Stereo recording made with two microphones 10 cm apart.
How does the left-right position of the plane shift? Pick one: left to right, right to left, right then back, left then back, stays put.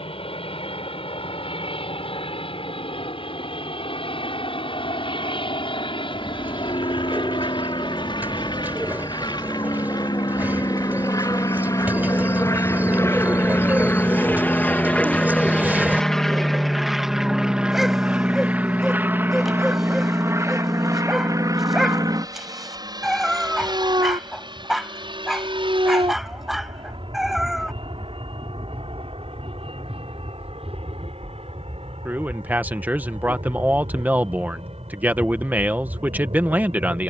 left to right.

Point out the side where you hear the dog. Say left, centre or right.
centre.